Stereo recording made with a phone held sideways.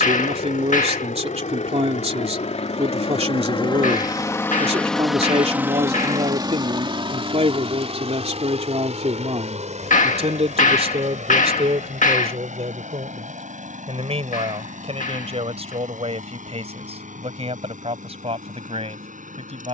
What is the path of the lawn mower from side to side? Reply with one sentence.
In this clip you hear the lawn mower go from the left side to the right.